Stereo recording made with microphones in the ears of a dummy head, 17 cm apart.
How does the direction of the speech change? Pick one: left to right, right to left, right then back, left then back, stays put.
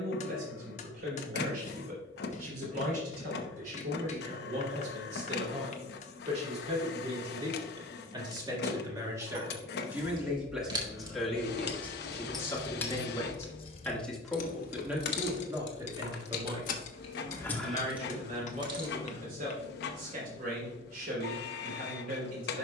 left then back.